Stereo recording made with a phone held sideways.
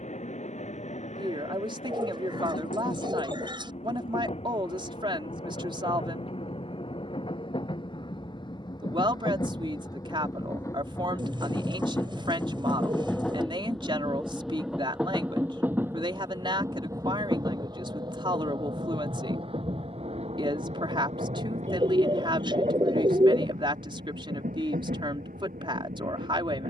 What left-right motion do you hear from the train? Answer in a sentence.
You can hear the train move from left to right.